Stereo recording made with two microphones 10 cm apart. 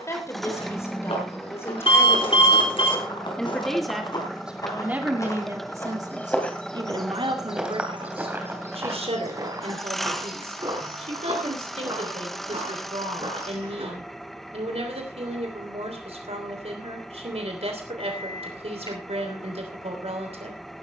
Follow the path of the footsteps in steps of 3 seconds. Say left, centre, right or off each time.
left, left, centre, right, right, off, off.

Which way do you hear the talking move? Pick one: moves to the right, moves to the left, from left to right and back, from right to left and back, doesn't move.
moves to the right.